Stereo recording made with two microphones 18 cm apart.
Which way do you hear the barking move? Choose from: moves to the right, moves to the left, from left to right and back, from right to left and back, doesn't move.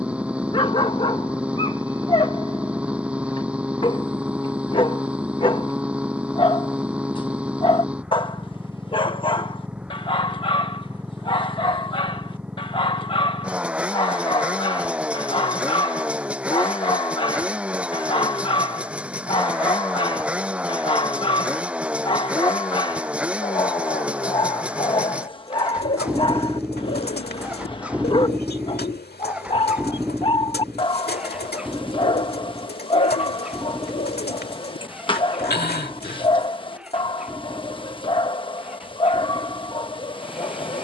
doesn't move.